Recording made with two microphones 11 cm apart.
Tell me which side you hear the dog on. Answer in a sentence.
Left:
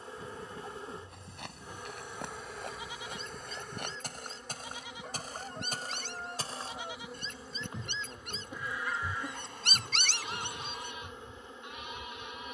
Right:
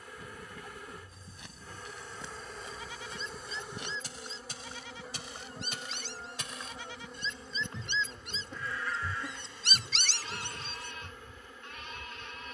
In this clip you hear the dog on the left.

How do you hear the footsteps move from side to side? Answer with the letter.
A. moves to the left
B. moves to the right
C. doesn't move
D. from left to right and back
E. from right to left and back
B.